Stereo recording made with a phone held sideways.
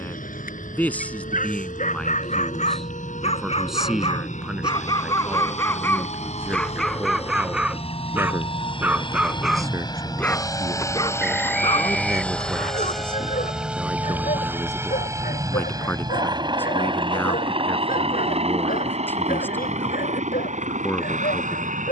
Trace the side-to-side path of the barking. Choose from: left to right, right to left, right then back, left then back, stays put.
right then back.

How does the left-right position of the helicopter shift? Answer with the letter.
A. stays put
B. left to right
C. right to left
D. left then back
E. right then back
B.